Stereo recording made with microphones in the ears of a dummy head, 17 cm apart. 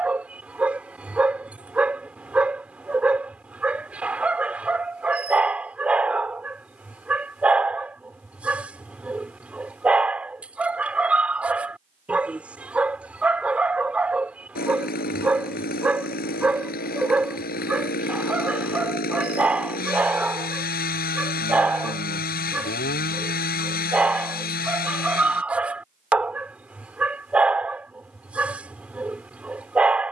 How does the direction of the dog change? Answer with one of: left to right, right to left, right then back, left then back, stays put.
stays put.